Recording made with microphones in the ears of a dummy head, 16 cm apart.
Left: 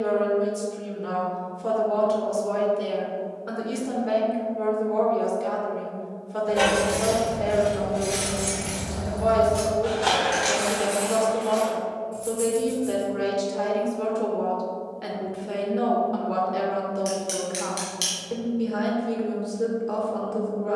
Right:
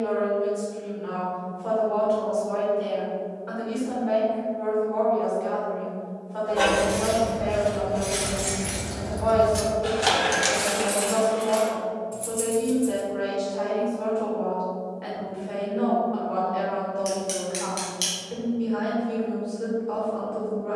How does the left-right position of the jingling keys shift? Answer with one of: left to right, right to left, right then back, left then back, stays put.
left to right.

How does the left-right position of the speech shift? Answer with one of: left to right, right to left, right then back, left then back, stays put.
stays put.